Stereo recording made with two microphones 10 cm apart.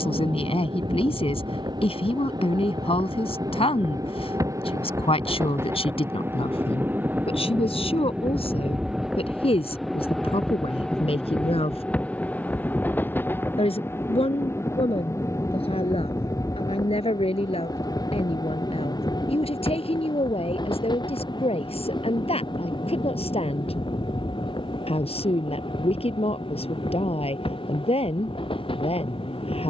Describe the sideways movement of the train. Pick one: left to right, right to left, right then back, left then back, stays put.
right to left.